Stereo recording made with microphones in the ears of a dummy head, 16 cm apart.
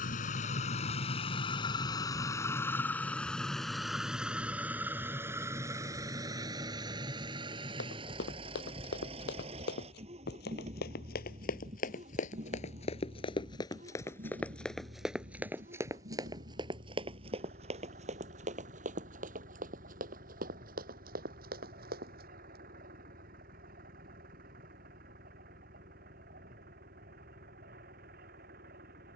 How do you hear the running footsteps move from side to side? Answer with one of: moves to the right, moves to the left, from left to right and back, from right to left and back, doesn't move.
moves to the right.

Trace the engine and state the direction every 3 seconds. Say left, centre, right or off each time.
left, centre, right, right, right, right, right, right, right, right.